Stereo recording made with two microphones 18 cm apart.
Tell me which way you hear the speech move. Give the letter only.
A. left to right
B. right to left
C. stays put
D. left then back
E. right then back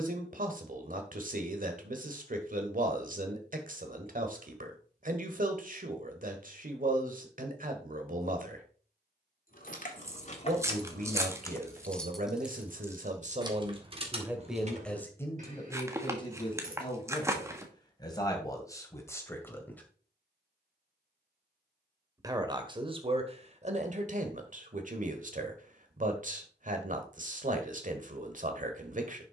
D.